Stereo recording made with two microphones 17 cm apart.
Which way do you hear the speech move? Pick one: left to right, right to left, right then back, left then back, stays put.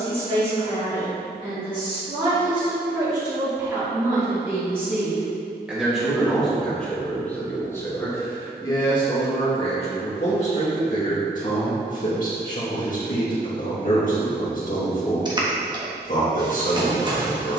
right to left.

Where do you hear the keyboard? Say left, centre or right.
right.